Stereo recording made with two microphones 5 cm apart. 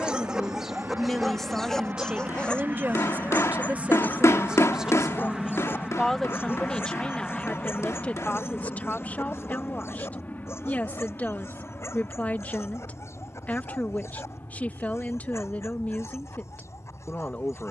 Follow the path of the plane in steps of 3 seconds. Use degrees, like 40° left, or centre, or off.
40° right, 10° right, 10° left, 40° left, 50° left, 60° left.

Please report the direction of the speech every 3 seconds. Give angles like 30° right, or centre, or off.
10° right, 20° right, 20° left, 30° left, 30° left, 30° left.